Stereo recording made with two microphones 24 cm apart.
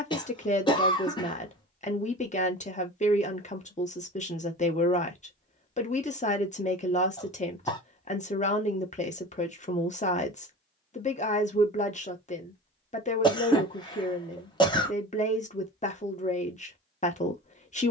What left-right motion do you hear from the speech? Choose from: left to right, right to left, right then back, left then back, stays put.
stays put.